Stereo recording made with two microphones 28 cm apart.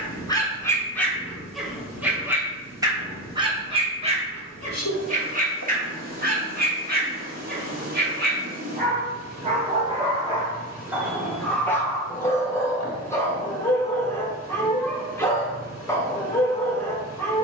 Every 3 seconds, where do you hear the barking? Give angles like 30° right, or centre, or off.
centre, 20° right, 30° right, 10° right, 10° left, 10° left.